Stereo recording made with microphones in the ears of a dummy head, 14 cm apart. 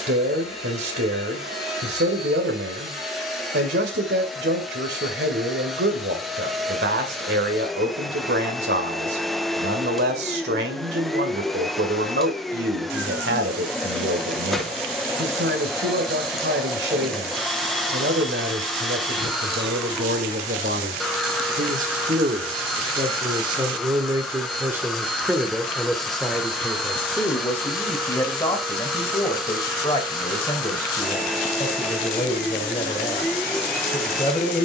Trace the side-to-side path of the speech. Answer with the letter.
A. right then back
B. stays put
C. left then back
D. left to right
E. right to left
E.